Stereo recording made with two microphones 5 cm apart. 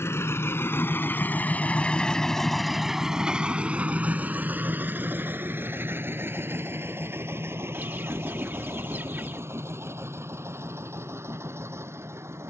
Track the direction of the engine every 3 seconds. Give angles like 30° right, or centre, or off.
30° left, 30° right, 60° right, 60° right.